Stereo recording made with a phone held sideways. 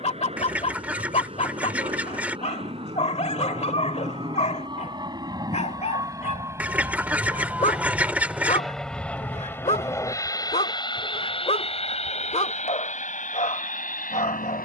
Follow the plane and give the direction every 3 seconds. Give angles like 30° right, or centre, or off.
50° right, 30° right, 10° right, 30° left, 50° left.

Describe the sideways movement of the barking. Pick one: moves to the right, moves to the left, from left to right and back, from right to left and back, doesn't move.
doesn't move.